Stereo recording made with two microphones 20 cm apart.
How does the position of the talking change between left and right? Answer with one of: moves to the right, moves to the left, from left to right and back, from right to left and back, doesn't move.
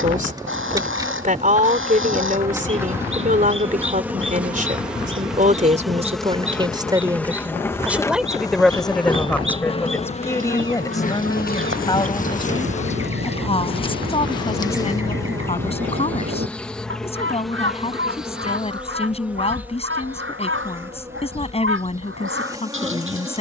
moves to the left.